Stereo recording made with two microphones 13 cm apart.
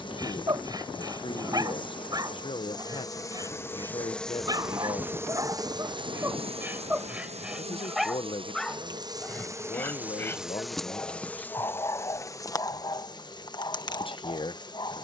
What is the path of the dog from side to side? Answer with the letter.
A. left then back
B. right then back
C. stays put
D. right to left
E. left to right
D.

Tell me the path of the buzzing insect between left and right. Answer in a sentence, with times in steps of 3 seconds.
In this clip you hear the buzzing insect on the left from 0 s, in the centre from 3 s, on the right from 6 s, in the centre from 9 s and on the left from 12 s.